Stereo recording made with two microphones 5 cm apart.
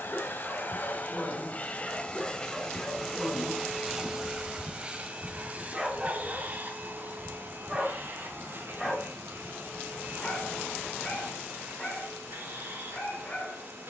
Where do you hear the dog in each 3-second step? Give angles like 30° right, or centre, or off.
20° left, centre, 10° right, 20° left, 30° left.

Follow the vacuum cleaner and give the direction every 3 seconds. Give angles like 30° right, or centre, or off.
30° left, 20° right, 50° right, 60° right, 60° right.